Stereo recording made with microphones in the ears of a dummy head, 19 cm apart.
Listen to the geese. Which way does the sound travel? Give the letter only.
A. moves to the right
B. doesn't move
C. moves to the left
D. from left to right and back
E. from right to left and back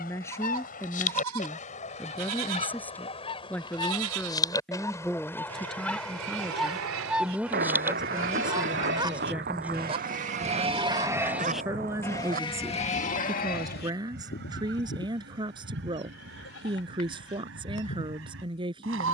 A.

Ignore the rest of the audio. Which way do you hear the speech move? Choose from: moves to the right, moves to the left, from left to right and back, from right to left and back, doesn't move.
moves to the right.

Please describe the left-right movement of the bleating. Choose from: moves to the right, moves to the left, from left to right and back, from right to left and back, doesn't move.
moves to the left.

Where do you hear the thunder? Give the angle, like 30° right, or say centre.
50° right.